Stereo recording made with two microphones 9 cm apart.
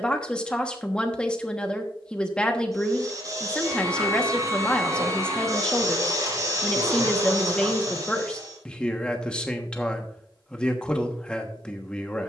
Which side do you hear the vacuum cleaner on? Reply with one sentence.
You can hear the vacuum cleaner on the right.